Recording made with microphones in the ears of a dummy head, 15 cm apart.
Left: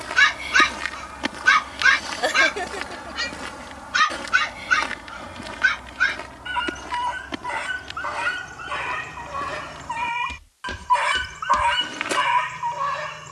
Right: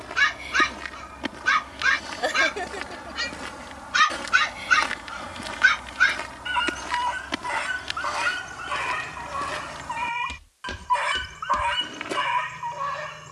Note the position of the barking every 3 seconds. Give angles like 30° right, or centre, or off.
10° left, 10° right, 10° right, 10° left, 10° left.